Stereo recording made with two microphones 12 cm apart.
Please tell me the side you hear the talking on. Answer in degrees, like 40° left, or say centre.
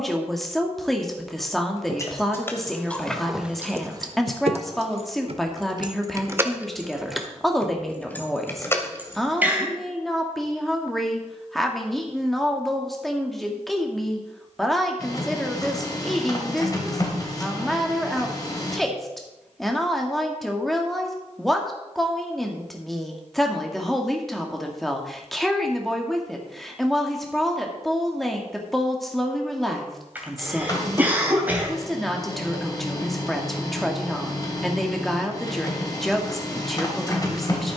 centre.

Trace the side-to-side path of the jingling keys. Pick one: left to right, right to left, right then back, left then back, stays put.
right then back.